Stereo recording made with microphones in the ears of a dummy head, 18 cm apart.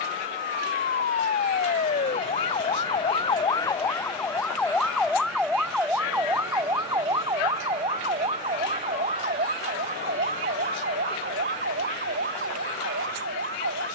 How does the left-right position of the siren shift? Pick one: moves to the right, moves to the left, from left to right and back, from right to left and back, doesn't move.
moves to the right.